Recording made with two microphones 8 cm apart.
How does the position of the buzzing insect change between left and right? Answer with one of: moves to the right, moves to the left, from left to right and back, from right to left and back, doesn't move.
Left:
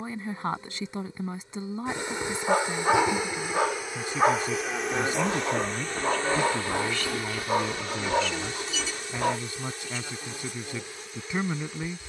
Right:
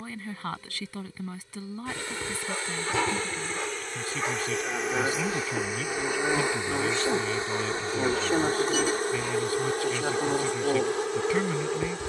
moves to the right.